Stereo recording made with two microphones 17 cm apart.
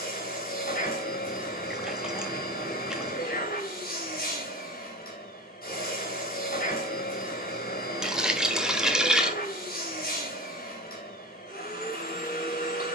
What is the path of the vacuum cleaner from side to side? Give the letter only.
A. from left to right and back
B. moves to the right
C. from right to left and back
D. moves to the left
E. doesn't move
E.